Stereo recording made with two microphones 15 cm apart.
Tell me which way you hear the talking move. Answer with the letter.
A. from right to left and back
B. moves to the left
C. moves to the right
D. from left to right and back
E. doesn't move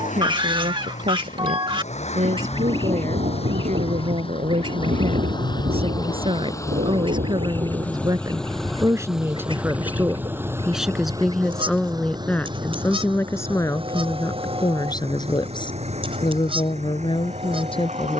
B.